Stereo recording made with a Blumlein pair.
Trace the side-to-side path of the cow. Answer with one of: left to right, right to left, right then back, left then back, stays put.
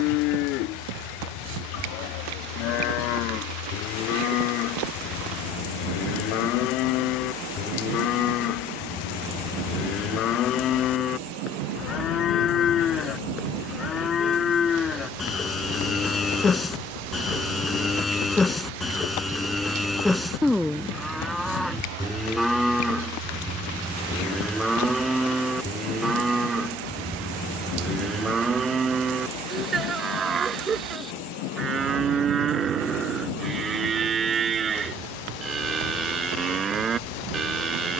left to right.